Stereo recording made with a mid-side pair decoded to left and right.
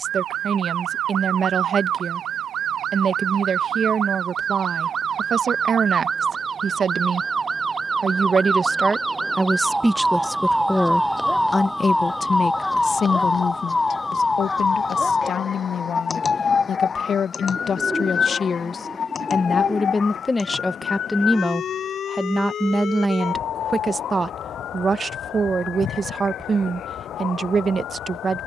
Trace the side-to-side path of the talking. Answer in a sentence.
You can hear the talking go left and come back.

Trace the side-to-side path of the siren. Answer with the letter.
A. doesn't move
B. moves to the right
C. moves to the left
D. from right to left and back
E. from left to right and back
C.